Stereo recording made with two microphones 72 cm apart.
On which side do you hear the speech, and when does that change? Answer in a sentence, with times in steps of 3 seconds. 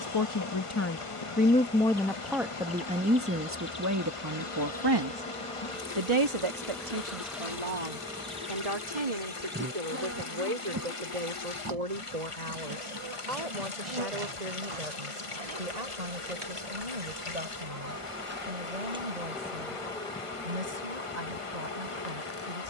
In this clip you hear the speech in the centre from 0 s and on the right from 3 s.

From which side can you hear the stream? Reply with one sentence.
You can hear the stream on the left.